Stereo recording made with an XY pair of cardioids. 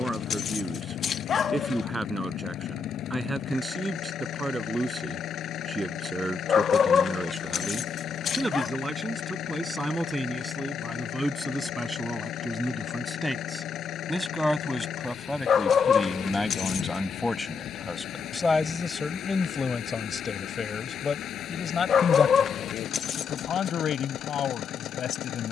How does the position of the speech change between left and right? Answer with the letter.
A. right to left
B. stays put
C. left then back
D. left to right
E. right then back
A.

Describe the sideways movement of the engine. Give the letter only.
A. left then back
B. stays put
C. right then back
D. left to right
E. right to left
B.